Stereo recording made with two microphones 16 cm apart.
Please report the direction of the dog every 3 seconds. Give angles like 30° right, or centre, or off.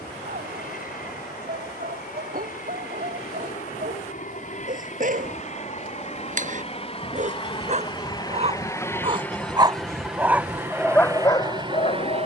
60° right, 60° right, 50° right, centre.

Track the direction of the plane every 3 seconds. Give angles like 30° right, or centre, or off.
60° left, 50° left, 30° left, 10° right.